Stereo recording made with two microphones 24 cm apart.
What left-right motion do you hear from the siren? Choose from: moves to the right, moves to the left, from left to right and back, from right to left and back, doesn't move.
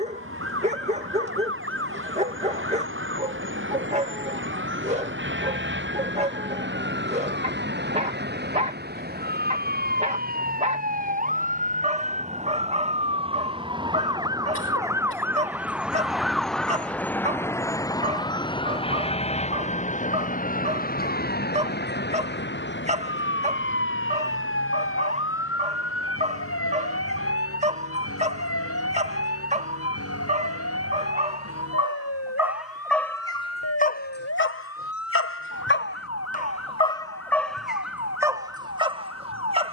moves to the left.